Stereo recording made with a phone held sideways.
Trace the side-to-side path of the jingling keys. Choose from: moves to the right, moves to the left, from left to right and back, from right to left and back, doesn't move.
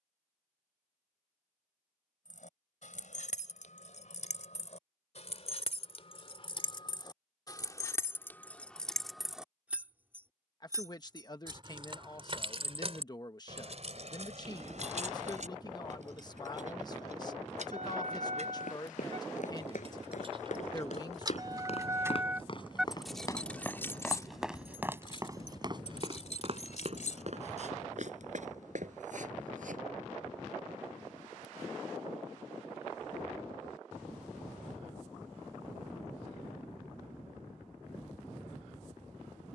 from left to right and back.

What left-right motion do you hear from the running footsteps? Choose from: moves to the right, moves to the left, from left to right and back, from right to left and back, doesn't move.
moves to the right.